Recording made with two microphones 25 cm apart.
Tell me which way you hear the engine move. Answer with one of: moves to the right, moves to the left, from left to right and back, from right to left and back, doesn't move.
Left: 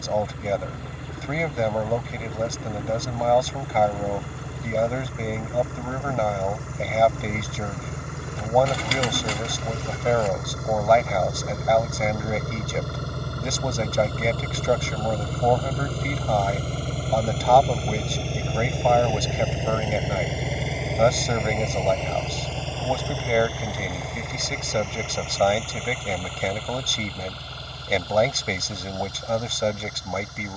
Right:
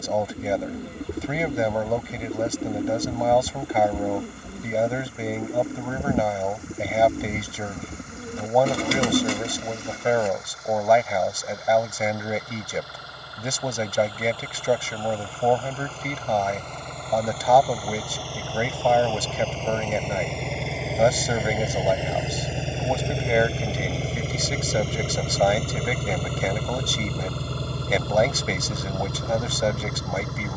moves to the right.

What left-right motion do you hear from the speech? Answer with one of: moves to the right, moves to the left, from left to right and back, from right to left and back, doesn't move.
doesn't move.